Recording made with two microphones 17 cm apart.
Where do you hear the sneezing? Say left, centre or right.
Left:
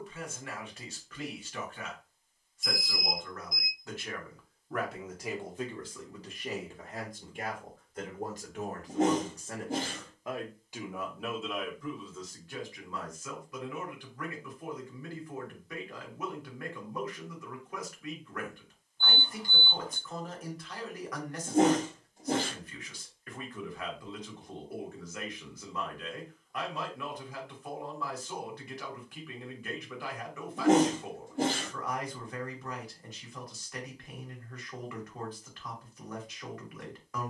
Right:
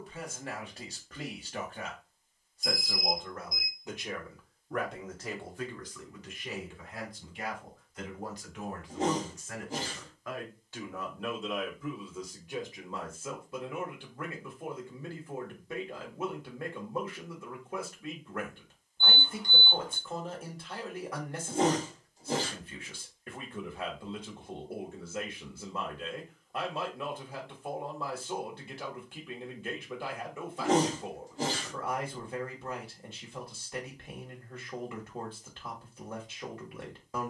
left.